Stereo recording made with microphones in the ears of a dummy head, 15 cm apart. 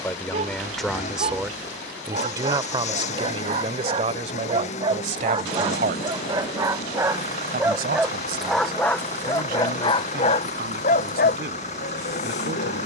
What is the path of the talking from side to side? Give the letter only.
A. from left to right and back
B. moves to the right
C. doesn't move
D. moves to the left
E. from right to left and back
B.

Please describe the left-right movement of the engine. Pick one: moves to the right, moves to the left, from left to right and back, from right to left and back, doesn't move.
doesn't move.